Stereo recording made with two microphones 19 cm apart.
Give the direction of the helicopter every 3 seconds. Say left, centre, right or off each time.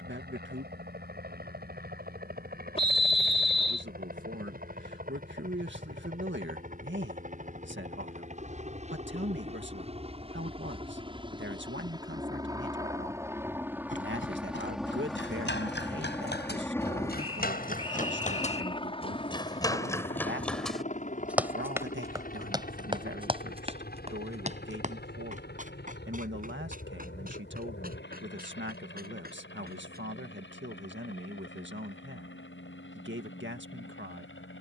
right, right, right, right, centre, centre, left, left, left, left, left, left.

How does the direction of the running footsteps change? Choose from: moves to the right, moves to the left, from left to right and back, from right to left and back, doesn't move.
moves to the right.